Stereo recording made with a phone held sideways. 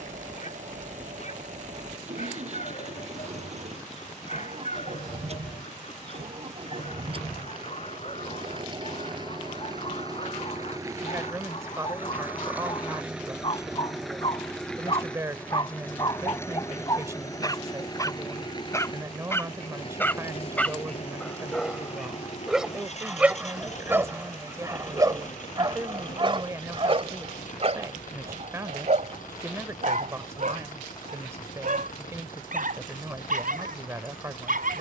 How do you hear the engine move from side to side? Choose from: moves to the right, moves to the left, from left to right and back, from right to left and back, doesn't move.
moves to the left.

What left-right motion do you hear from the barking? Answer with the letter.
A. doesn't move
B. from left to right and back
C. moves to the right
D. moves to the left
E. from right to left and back
C.